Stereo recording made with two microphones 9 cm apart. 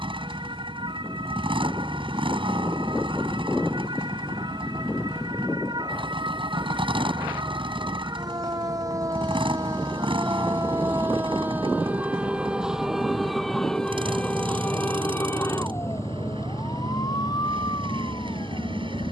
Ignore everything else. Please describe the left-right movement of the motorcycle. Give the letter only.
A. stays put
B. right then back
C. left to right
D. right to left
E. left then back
A.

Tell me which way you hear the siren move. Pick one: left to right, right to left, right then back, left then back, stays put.
right to left.